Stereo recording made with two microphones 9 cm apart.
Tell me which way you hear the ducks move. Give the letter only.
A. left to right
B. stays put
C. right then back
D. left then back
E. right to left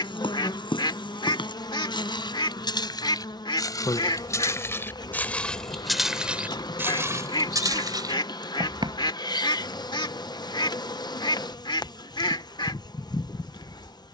B.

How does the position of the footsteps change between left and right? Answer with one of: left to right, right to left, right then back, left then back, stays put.
left to right.